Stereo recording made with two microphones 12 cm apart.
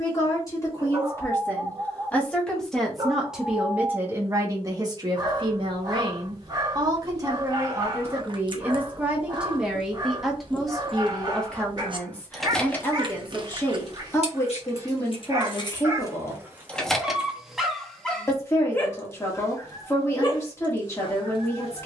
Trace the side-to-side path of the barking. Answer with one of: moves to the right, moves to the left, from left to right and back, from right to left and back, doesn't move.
moves to the left.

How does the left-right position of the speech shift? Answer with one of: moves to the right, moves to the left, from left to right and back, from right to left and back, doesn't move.
from left to right and back.